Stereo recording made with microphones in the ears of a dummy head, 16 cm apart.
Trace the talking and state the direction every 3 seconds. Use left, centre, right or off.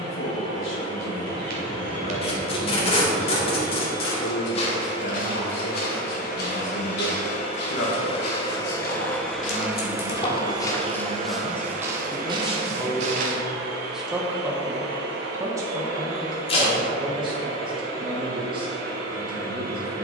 left, left, left, left, centre, right, right.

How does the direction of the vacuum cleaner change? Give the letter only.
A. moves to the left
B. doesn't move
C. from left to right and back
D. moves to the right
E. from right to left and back
D.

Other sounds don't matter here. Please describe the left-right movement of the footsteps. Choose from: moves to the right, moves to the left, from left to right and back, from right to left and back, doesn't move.
from right to left and back.